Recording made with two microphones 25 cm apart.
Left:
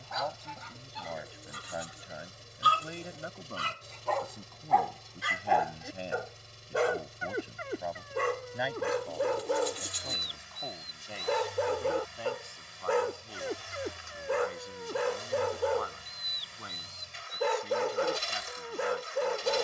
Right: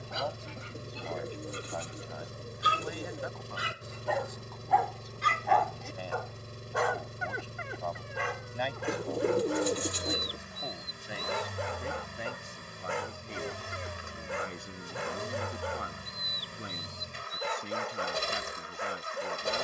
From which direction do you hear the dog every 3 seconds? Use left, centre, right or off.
right, centre, left, left, left, left, left.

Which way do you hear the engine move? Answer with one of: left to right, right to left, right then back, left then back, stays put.
stays put.